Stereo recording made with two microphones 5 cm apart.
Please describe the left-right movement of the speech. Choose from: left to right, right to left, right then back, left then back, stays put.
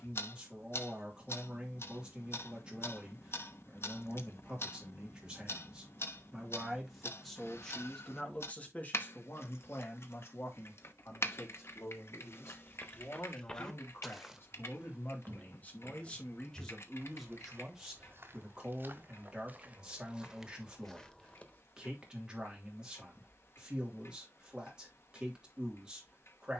left then back.